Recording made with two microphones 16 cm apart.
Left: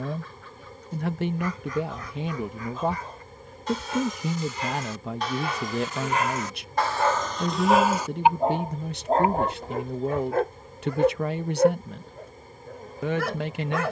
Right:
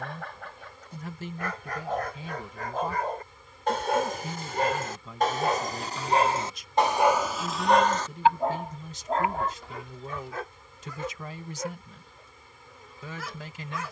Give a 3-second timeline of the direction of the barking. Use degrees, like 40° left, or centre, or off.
70° right, 50° right, centre, 50° left, 70° left.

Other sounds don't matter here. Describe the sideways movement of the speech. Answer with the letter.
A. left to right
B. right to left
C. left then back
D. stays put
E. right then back
D.